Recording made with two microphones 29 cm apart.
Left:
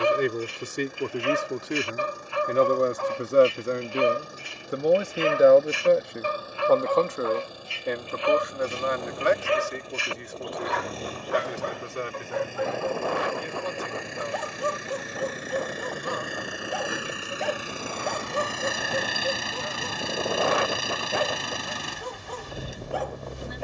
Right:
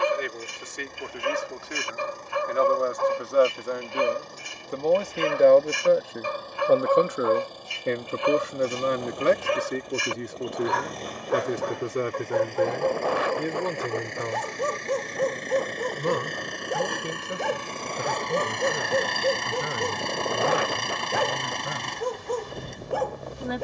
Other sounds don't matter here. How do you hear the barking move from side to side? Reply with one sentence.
You can hear the barking stay in one place.